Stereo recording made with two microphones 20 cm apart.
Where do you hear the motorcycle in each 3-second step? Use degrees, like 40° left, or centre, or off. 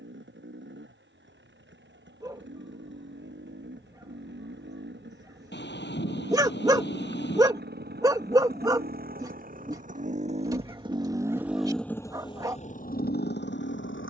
70° right, 60° right, 50° right, 30° right, 50° left.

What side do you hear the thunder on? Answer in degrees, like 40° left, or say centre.
60° left.